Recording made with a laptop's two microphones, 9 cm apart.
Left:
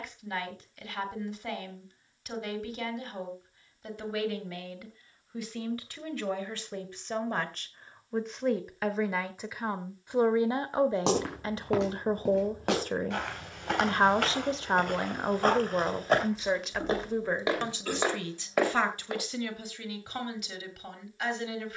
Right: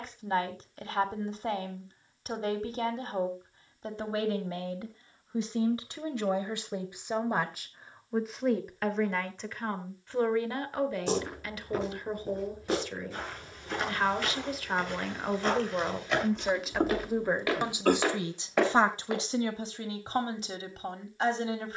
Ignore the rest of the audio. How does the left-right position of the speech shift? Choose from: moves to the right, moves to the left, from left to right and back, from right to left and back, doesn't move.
from right to left and back.